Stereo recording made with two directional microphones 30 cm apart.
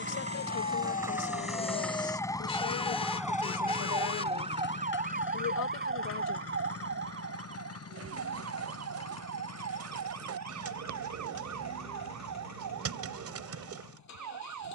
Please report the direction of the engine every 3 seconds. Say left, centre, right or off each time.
centre, left, left, left, left.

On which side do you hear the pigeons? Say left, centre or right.
right.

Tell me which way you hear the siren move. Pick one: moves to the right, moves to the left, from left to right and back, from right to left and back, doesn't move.
moves to the right.